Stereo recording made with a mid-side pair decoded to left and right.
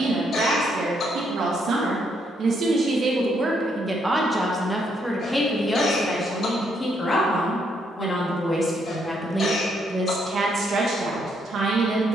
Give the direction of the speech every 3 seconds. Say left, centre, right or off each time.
right, centre, left, right.